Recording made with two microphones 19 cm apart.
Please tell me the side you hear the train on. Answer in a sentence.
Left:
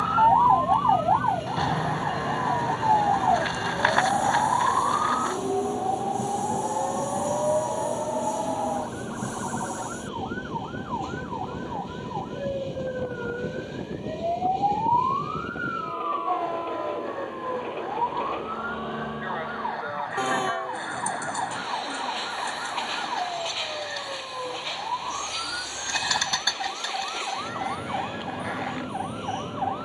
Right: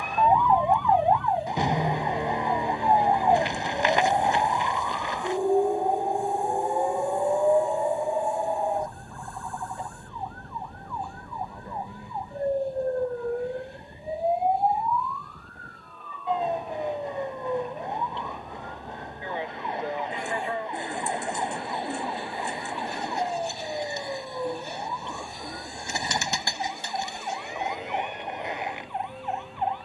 You can hear the train on the left.